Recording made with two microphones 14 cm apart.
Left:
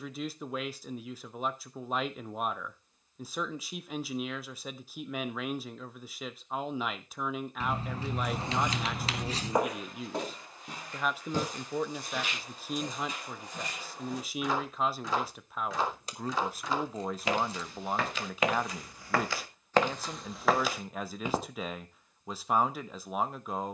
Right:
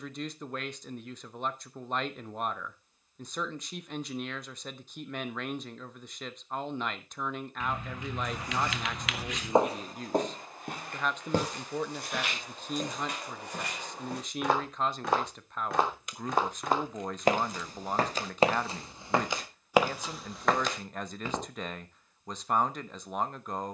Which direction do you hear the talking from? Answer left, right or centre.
centre.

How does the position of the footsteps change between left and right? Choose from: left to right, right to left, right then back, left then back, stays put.
right then back.